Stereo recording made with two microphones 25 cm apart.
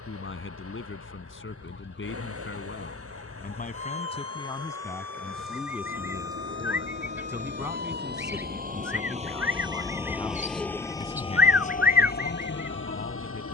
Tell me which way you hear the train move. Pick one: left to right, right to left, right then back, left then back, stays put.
right to left.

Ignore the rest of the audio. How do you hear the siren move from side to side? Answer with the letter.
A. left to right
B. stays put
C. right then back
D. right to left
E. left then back
A.